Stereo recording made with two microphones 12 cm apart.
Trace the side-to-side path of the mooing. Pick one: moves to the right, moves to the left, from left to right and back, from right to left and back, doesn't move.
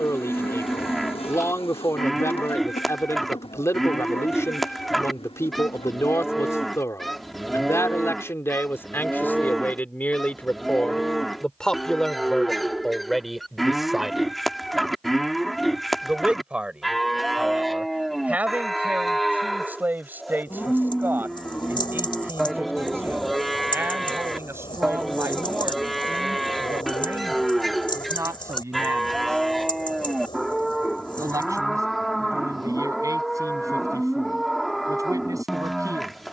doesn't move.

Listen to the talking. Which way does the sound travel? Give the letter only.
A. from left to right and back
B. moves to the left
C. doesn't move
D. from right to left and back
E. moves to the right
E.